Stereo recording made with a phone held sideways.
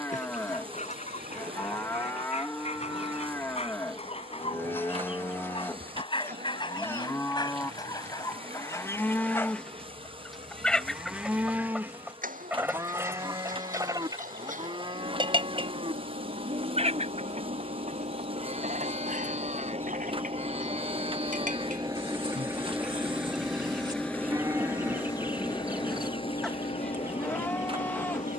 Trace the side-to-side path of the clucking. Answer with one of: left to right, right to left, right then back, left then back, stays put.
left to right.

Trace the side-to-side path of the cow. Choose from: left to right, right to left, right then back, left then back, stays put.
right then back.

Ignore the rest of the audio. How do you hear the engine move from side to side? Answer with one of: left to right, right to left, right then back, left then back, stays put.
right to left.